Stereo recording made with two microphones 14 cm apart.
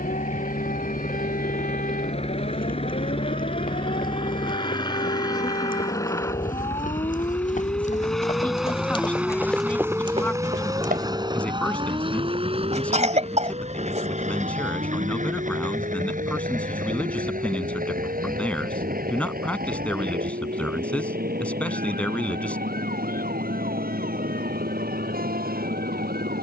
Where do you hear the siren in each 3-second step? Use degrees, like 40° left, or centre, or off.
70° left, 60° left, 30° left, 20° right, 50° right, 60° right, 70° right, 70° right, 70° right.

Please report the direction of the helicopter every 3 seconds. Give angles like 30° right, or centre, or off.
50° left, 30° left, 10° left, 20° right, 40° right, 60° right, 70° right, 70° right, 80° right.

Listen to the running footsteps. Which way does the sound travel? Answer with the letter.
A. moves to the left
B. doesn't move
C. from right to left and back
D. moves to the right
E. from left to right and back
D.